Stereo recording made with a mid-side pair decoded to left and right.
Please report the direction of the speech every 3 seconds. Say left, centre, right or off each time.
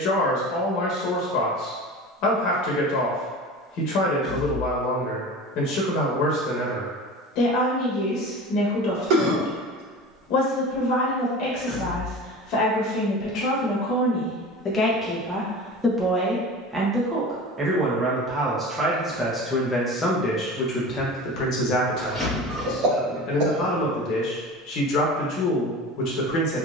left, left, left, left, left, centre, centre, left, left.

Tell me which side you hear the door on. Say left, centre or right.
centre.